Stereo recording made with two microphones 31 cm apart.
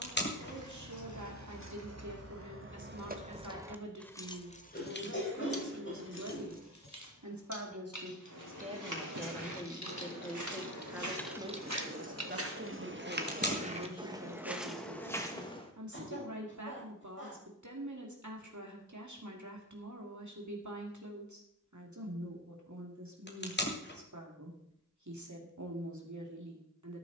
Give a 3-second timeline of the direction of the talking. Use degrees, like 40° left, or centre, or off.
60° right, 60° right, 50° right, centre, 50° right, 60° right, 60° right, 60° right, 60° right.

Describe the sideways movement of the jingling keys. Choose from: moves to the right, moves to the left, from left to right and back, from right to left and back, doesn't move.
from right to left and back.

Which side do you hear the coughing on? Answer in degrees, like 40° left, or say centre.
40° left.